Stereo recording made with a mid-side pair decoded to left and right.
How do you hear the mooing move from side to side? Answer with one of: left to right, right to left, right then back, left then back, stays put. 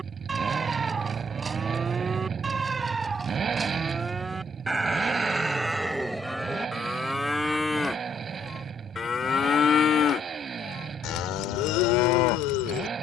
right to left.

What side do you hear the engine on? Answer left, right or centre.
right.